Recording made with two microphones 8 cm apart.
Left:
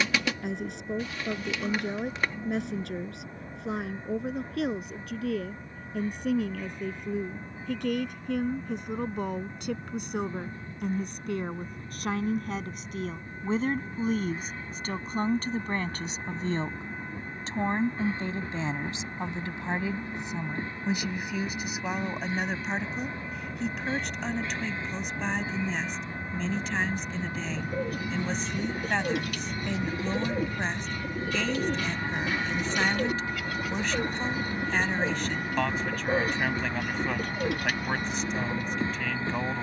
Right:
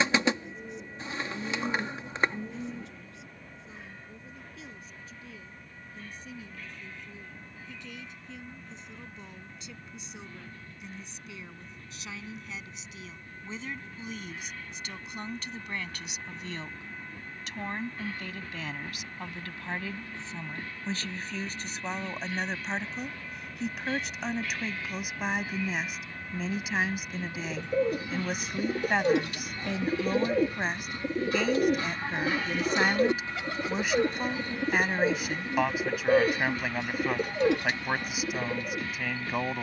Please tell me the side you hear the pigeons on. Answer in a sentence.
In this clip you hear the pigeons on the right.